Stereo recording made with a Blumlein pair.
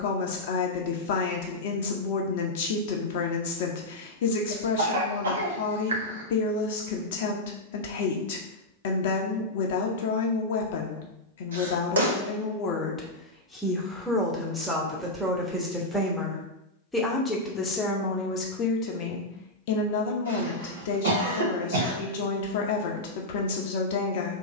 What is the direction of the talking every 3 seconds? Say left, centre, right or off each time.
left, left, left, left, centre, centre, left, left.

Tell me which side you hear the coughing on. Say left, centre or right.
right.